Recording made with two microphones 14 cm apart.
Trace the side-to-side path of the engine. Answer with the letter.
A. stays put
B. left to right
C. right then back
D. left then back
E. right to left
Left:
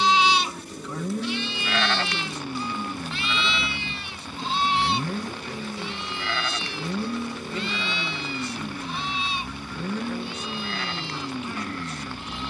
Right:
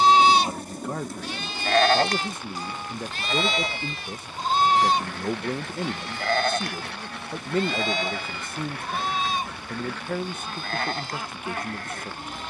A.